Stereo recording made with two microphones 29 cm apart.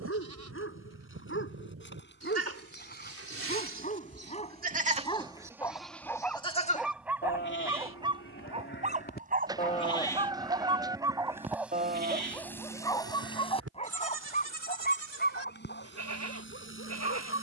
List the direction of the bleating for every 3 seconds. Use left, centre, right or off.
right, right, left, centre, right, right.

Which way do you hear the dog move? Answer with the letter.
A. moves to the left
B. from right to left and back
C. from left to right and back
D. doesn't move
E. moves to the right
C.